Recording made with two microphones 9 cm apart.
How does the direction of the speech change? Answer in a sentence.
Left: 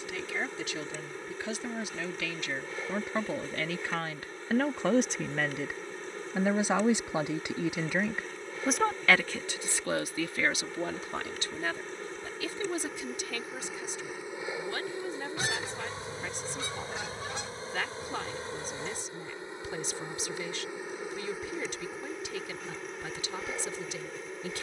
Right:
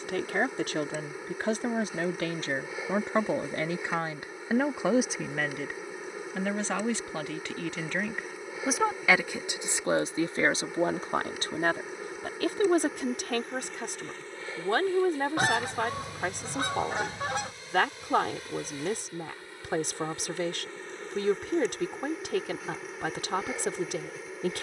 In this clip you hear the speech move from right to left and back again.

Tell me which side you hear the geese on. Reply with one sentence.
You can hear the geese on the right.